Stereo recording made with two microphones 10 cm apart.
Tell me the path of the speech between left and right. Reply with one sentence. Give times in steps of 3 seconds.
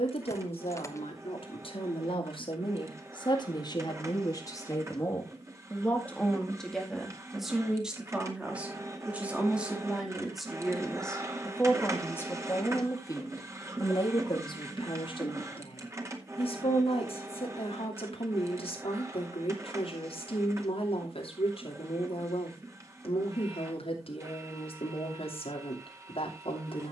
You can hear the speech on the left from 0 s, in the centre from 6 s and on the left from 12 s.